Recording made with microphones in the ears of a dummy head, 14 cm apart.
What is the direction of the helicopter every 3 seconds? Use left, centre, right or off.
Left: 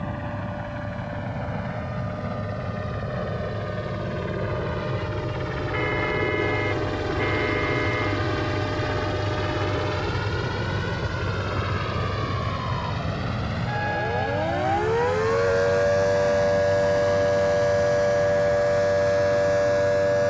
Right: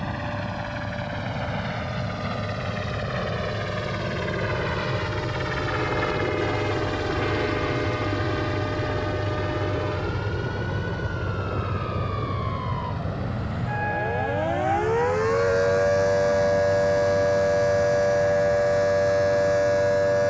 right, right, centre, left, left, left, left.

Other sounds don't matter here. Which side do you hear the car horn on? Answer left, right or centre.
left.